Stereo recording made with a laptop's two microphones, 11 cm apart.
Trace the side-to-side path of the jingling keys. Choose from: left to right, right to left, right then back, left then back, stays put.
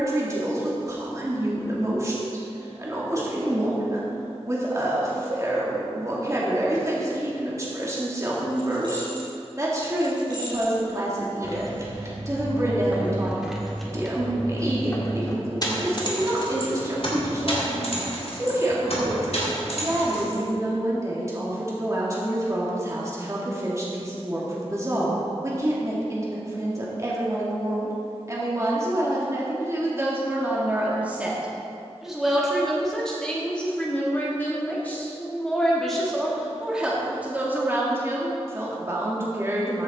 right to left.